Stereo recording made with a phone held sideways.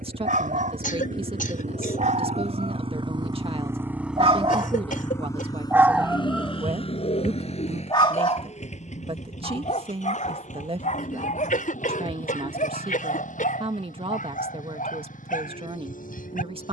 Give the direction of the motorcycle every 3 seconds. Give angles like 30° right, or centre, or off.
60° right, centre, 50° left, 60° left, 60° left, 70° left.